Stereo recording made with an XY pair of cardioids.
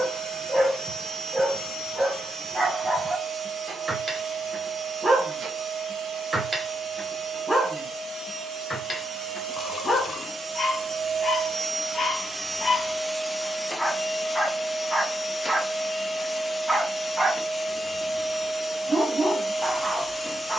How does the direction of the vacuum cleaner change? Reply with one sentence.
You can hear the vacuum cleaner move to the left.